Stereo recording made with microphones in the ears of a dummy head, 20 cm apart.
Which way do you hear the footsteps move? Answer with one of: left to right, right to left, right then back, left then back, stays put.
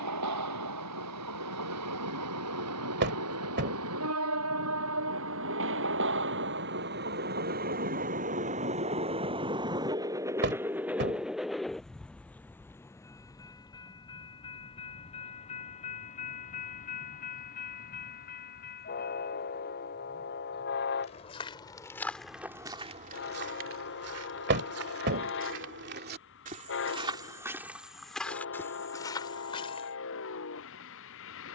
right then back.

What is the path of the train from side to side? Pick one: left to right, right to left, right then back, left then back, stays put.
right to left.